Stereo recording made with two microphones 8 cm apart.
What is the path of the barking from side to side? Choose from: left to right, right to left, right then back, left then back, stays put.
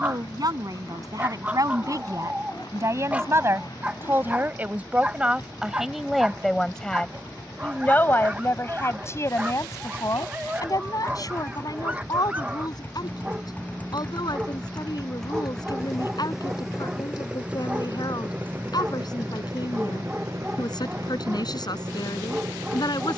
stays put.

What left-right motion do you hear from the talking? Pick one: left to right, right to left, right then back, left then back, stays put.
right to left.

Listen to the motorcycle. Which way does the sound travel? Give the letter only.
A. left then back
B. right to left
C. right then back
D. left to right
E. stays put
D.